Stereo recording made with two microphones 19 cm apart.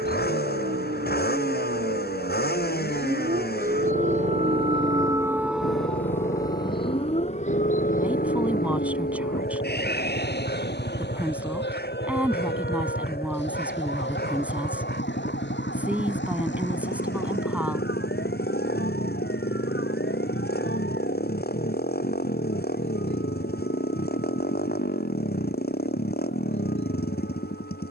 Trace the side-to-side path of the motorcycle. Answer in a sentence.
In this clip you hear the motorcycle stay put.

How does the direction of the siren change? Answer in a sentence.
In this clip you hear the siren move from right to left.